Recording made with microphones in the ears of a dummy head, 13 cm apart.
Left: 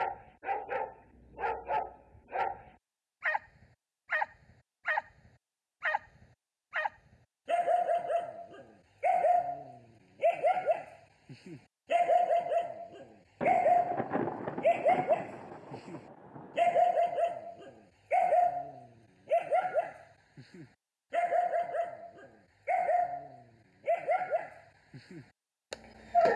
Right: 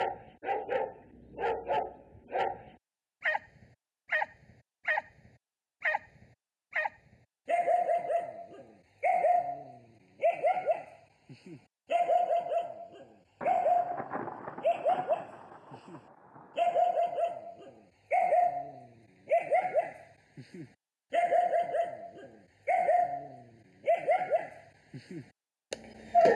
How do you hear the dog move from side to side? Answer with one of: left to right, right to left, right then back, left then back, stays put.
left then back.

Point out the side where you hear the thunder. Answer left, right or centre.
left.